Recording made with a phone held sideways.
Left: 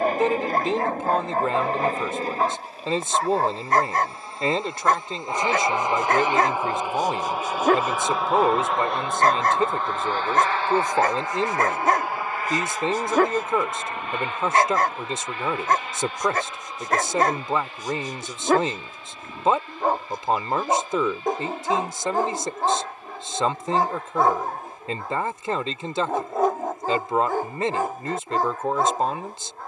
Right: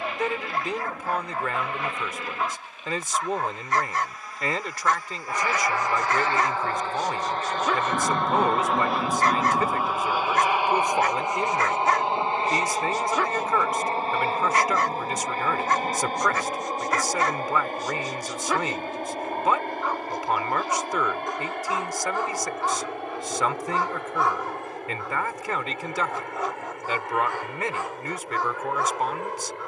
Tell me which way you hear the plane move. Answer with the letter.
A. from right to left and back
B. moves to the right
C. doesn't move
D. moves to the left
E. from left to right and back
B.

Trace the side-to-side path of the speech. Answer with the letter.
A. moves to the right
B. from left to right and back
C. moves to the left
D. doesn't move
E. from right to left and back
D.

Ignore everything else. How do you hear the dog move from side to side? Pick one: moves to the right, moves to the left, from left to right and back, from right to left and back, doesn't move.
doesn't move.